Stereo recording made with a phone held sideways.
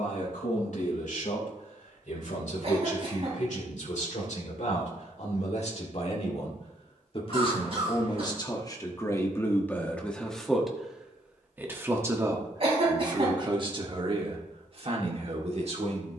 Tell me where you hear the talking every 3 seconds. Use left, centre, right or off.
left, left, left, centre, right, right.